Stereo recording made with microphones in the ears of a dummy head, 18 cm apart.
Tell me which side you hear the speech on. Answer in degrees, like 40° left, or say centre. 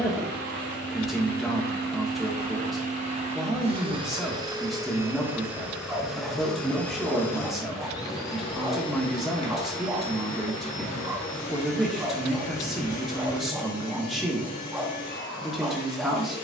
centre.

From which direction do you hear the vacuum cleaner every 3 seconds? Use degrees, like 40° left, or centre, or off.
50° right, 20° right, 10° left, 30° left, 40° left, 50° left.